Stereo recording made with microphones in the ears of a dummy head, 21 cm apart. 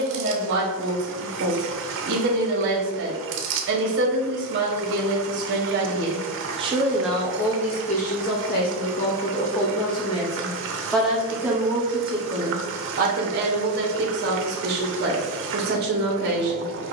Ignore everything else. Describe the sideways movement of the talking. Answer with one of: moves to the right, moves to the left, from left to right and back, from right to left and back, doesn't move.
from right to left and back.